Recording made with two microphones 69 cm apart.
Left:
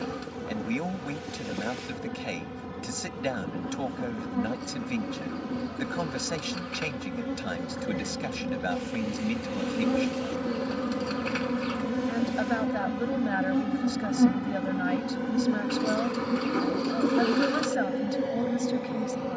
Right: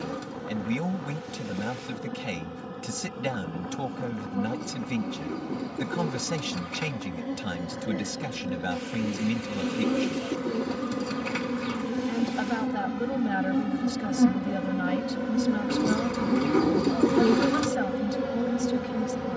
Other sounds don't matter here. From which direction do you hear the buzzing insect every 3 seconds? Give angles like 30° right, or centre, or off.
50° left, 50° left, 40° left, 20° left, centre, 20° right, 40° right.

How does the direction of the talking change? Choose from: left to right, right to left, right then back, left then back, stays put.
stays put.